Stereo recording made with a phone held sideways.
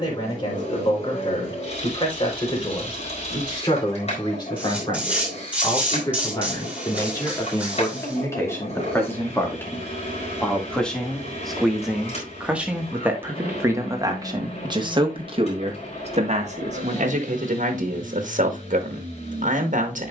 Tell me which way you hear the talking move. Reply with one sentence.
You can hear the talking travel towards the right.